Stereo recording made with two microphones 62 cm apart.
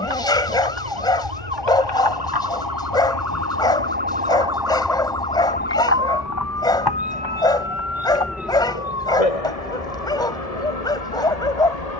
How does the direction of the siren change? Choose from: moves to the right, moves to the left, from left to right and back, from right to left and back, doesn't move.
moves to the left.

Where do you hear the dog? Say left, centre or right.
centre.